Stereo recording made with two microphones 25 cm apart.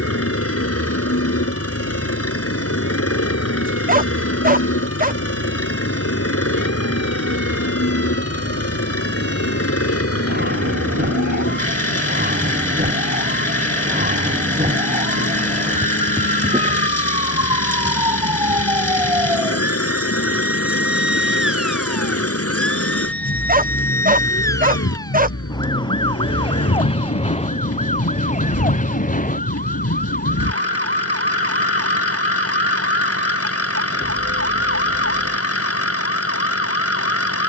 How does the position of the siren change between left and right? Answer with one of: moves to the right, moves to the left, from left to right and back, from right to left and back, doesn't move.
moves to the left.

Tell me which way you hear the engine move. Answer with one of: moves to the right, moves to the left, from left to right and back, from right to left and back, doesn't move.
doesn't move.